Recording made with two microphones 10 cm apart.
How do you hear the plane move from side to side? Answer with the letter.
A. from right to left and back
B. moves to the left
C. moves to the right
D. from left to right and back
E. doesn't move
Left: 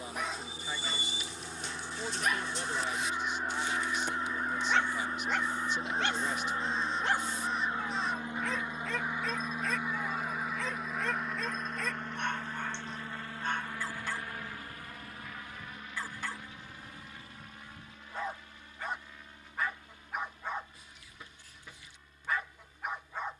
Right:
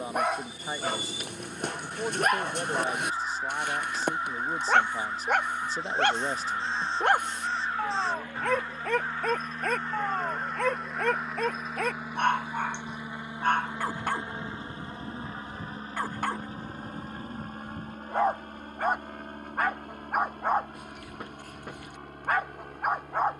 C.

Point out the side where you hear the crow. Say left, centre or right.
right.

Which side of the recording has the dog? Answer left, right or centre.
right.